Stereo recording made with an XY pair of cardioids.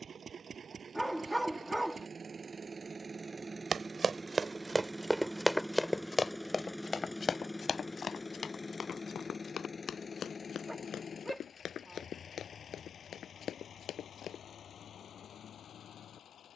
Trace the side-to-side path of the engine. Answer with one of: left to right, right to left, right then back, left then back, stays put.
right to left.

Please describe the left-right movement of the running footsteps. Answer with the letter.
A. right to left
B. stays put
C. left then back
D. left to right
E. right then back
A.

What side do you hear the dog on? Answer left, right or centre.
centre.